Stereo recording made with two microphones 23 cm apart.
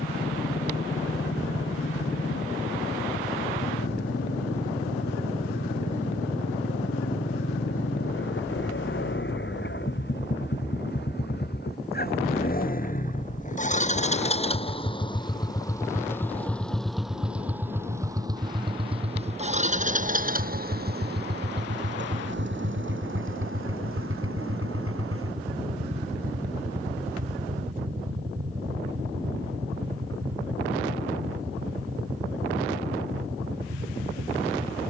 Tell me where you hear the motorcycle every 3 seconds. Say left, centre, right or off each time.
left, left, left, left, left, centre, right, right, right, right, right, right.